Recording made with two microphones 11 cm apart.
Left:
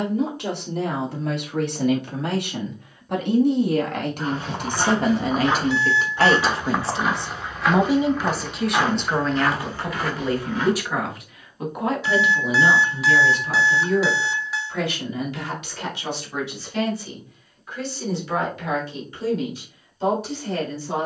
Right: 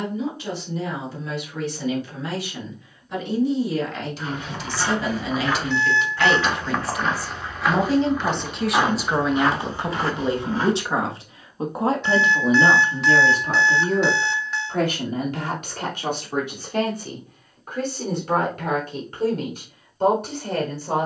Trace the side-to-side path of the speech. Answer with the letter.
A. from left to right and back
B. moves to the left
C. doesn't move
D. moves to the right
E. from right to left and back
D.